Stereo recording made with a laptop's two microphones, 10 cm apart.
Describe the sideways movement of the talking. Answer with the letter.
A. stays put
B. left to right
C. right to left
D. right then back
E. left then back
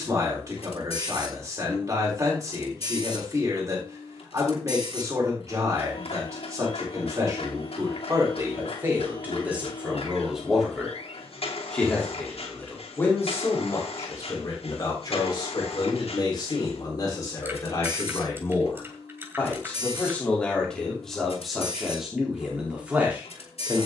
E.